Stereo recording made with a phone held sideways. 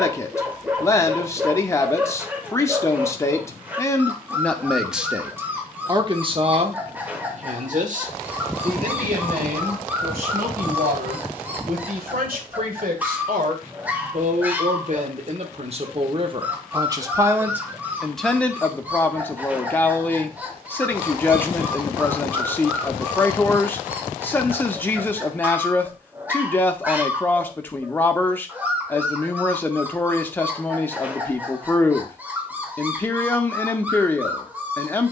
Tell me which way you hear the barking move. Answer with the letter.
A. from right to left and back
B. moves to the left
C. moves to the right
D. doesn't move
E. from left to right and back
D.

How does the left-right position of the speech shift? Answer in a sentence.
In this clip you hear the speech go right and come back.